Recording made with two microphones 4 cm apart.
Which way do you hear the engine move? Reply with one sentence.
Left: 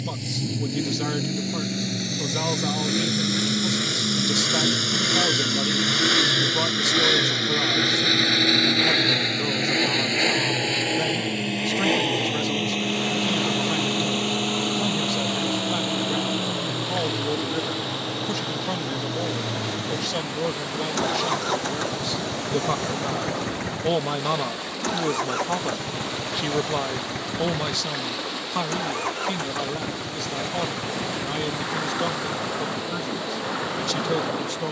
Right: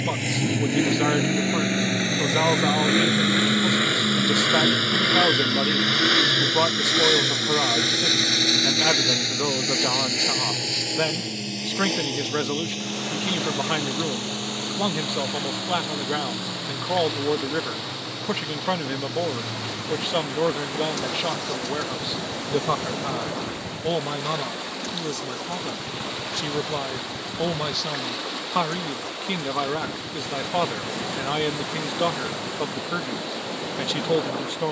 In this clip you hear the engine move to the left.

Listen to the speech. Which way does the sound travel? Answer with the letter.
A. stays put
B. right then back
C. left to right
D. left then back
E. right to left
D.